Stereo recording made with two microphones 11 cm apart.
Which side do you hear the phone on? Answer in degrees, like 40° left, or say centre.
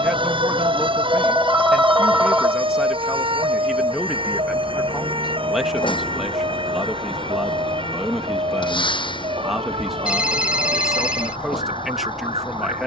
10° right.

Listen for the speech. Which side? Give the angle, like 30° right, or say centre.
centre.